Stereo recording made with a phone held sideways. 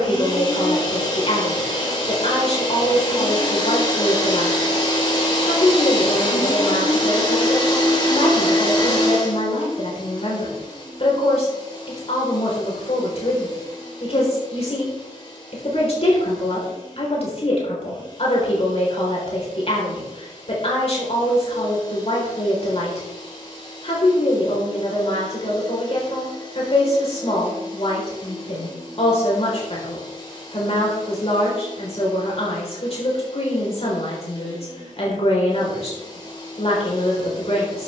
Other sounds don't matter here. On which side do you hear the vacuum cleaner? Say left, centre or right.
left.